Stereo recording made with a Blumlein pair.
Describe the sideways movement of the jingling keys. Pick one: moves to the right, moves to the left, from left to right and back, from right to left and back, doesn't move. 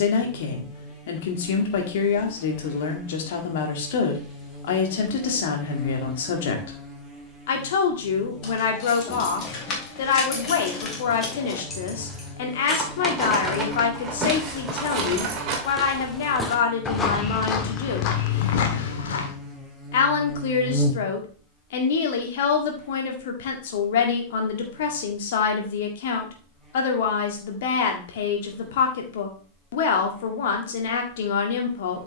moves to the right.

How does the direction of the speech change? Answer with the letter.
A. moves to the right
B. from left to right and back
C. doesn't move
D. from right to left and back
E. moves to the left
C.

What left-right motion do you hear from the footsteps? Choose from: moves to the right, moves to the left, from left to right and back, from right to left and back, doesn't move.
moves to the left.